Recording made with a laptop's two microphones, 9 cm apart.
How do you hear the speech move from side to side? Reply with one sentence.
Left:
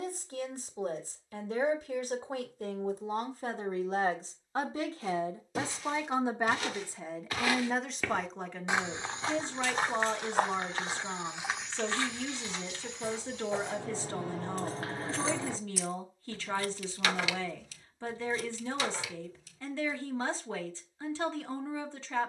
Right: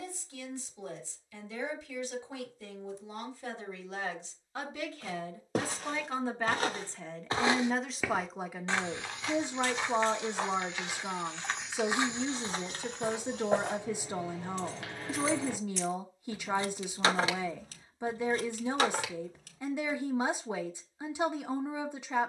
In this clip you hear the speech move from left to right.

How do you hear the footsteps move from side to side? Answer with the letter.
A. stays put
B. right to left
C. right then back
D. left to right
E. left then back
E.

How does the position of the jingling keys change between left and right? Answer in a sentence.
In this clip you hear the jingling keys move to the right.